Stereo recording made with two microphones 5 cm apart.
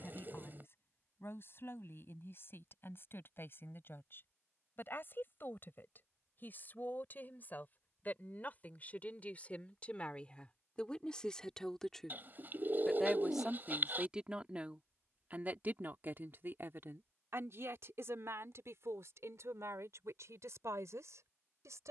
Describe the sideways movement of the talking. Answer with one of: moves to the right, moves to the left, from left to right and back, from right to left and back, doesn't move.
moves to the right.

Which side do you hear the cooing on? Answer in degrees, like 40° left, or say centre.
40° right.